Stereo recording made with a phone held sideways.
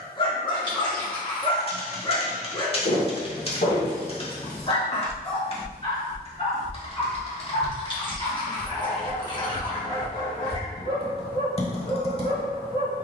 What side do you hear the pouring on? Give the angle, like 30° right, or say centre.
30° left.